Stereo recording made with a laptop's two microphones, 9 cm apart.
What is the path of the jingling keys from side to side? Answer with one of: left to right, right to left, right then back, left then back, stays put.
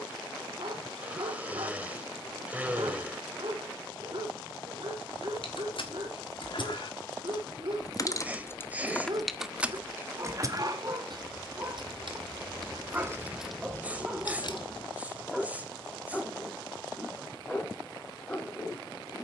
right then back.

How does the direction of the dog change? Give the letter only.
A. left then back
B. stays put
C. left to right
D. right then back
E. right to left
E.